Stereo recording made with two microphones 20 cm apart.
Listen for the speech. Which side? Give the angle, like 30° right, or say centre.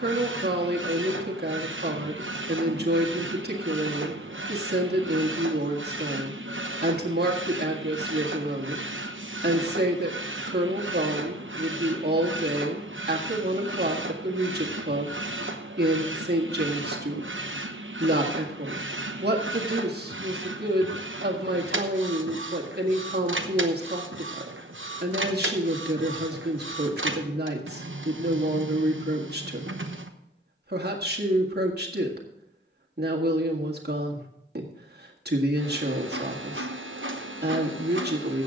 50° right.